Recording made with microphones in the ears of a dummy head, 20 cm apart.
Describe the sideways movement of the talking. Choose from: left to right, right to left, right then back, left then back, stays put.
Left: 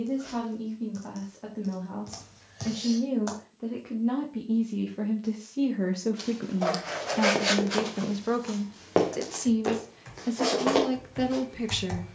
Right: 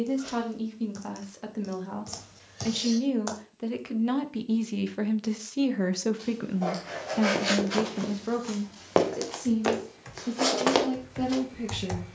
right to left.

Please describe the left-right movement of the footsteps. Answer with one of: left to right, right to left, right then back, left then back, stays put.
left to right.